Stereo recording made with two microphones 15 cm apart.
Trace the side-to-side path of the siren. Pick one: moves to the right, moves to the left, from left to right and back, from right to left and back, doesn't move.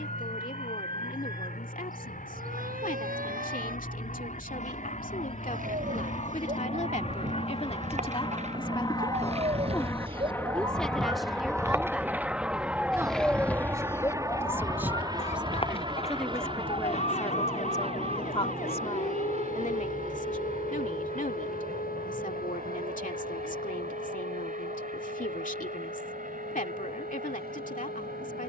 moves to the left.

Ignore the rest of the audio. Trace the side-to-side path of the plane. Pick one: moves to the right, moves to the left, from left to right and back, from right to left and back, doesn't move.
moves to the right.